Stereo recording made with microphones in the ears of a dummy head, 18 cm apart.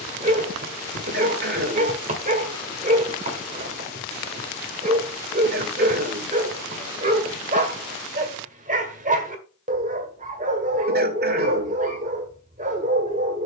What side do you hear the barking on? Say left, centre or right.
right.